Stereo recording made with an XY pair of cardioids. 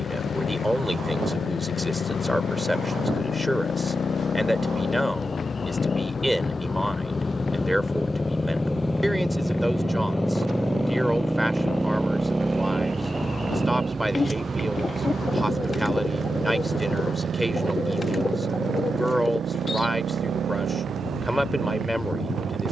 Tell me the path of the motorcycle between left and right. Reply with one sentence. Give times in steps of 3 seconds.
In this clip you hear the motorcycle on the left from 0 s, in the centre from 9 s and on the right from 12 s.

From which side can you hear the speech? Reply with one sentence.
In this clip you hear the speech in the centre.